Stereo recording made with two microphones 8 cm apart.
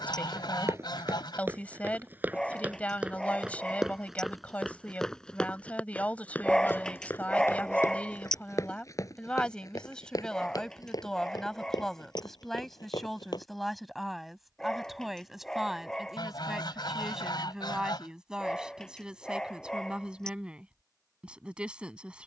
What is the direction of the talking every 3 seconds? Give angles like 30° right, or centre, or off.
20° left, 20° left, 20° left, 10° left, centre, 10° right, 10° right, 10° right.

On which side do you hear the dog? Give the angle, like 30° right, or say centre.
10° left.